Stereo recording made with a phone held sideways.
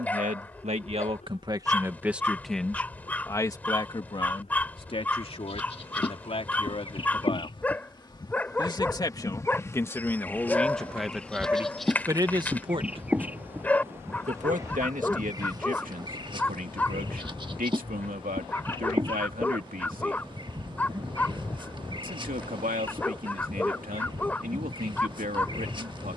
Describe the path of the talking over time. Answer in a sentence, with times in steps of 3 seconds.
In this clip you hear the talking on the right from 0 s, on the left from 3 s, in the centre from 9 s and on the right from 12 s.